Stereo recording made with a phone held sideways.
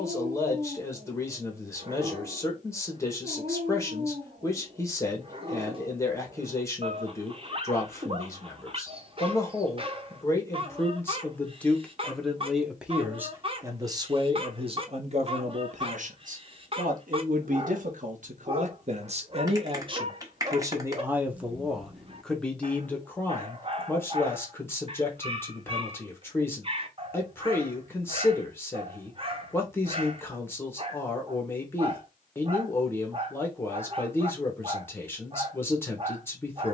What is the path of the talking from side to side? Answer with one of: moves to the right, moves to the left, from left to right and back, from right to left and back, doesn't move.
from left to right and back.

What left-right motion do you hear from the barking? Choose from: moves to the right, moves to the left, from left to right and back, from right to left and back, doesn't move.
doesn't move.